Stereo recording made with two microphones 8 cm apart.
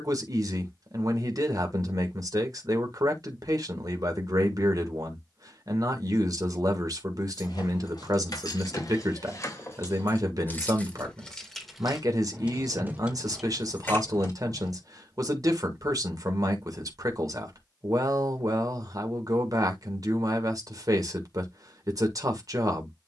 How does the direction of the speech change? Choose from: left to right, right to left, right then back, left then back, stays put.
stays put.